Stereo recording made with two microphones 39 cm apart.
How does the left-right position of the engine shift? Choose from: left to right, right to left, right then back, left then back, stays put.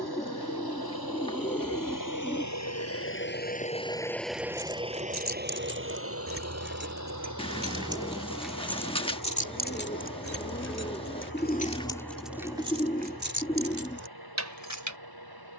left to right.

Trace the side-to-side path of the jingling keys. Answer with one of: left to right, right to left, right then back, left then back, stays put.
left then back.